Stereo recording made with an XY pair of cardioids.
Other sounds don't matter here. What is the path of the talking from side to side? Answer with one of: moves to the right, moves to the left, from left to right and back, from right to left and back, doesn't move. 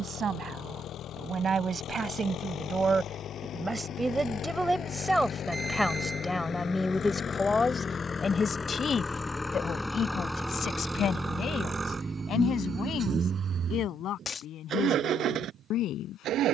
moves to the left.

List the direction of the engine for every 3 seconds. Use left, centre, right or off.
left, left, left, centre, right, right.